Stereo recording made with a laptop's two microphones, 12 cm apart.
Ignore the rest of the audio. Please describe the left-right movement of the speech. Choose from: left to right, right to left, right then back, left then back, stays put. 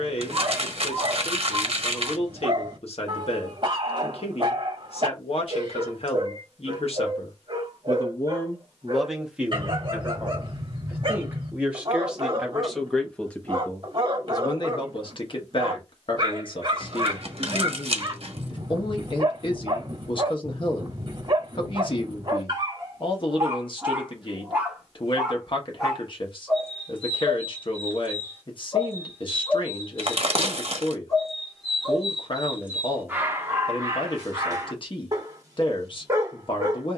right then back.